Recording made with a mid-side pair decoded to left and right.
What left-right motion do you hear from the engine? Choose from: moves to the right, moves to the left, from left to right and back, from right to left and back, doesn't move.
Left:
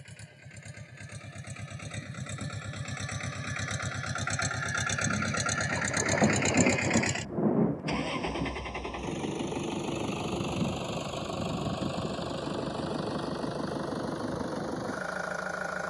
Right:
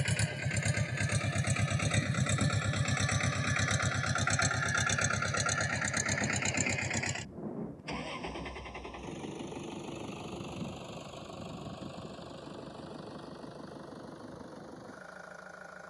moves to the left.